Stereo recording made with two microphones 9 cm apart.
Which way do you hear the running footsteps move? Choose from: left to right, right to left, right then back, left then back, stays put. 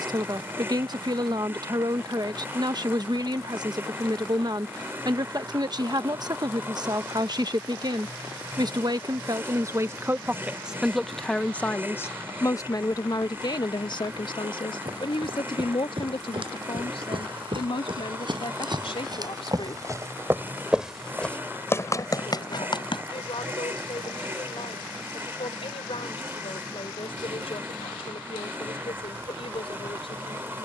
right to left.